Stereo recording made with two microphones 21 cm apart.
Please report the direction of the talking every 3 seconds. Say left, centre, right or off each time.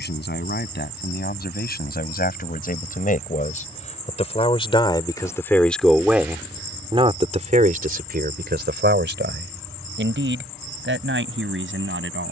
left, left, right, right.